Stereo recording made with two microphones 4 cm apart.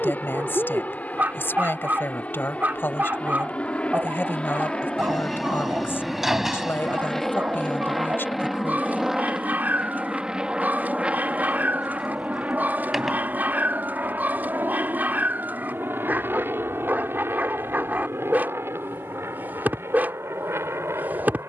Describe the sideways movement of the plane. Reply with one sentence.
You can hear the plane move from left to right.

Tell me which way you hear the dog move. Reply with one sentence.
You can hear the dog stay in one place.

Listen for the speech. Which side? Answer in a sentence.
You can hear the speech on the left.